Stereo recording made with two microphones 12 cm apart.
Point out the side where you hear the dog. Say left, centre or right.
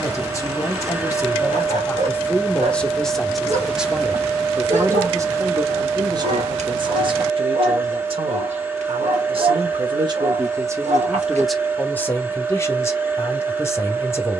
right.